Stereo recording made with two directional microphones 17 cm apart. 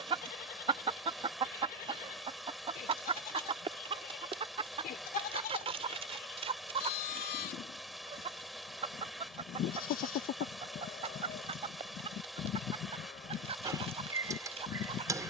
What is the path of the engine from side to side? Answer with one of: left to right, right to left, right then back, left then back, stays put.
stays put.